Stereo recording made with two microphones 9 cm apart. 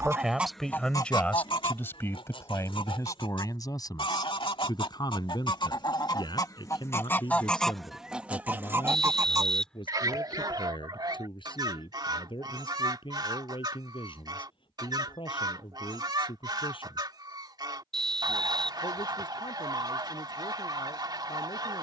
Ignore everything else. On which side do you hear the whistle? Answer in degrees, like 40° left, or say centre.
10° left.